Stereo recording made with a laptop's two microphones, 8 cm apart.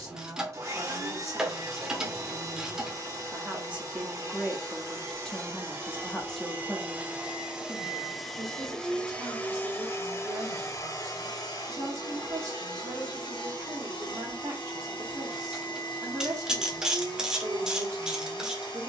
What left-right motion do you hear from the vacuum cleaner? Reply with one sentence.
In this clip you hear the vacuum cleaner move from right to left.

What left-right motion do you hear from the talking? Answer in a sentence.
In this clip you hear the talking go left and come back.